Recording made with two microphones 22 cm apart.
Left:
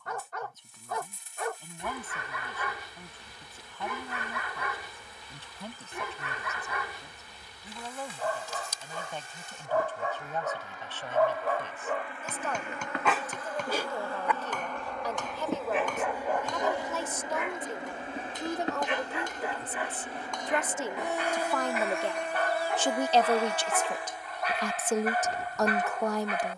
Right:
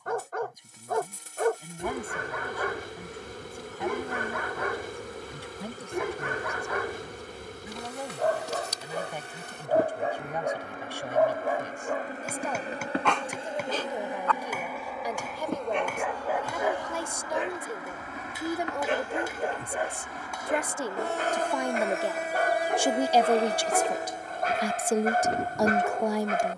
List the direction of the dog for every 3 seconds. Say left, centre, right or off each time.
right, right, right, right, centre, centre, right, right, right.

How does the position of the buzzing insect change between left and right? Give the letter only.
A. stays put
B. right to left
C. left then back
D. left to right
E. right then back
C.